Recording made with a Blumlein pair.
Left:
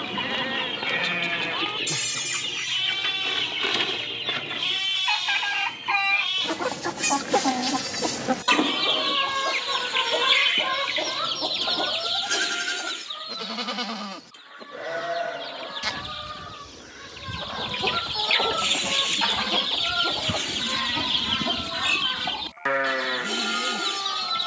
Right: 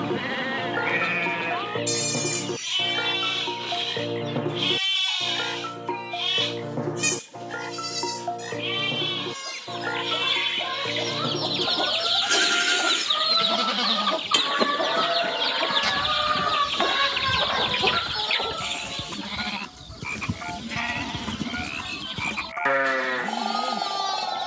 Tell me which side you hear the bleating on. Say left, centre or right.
centre.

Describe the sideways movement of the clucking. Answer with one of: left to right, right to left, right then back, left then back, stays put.
right then back.